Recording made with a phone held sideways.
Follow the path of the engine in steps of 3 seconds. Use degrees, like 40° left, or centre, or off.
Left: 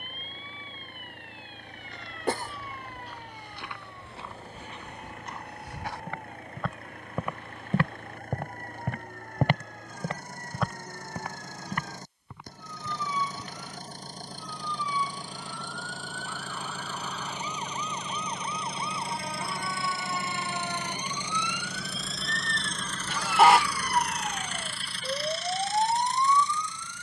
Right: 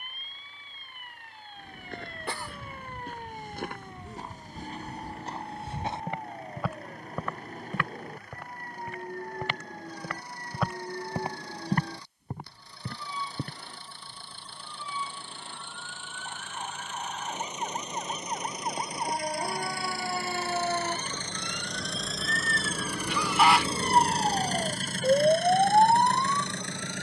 50° left, 50° left, 50° left, 50° left, 40° left, 40° left, 20° left, 10° right, 50° right.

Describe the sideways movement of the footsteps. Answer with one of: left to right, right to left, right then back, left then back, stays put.
left then back.